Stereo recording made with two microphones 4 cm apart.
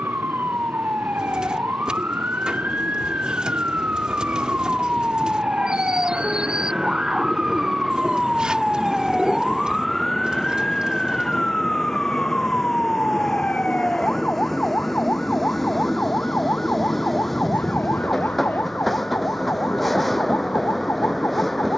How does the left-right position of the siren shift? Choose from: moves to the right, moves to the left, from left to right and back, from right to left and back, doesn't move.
moves to the left.